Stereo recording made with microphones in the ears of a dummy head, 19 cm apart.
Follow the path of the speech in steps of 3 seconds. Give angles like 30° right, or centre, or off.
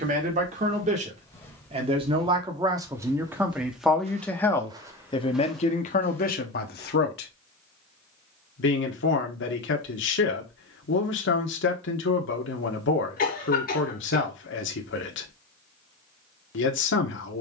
30° right, 10° left, 50° left, 60° left, 60° left, 60° left.